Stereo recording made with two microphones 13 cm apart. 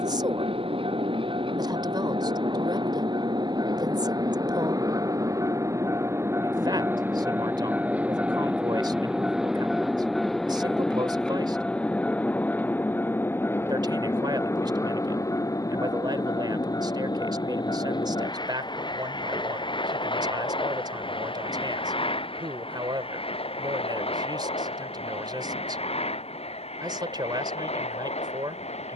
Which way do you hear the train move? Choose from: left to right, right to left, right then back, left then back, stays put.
right to left.